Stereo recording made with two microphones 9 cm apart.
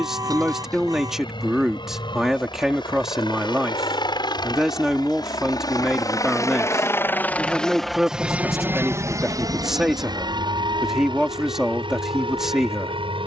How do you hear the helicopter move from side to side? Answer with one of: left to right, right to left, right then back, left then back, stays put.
left to right.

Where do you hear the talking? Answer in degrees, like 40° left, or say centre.
10° right.